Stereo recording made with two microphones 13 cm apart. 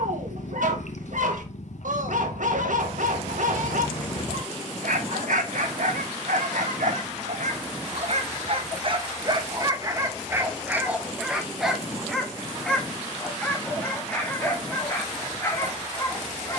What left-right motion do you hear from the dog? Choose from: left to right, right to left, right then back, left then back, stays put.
right to left.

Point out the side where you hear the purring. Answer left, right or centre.
left.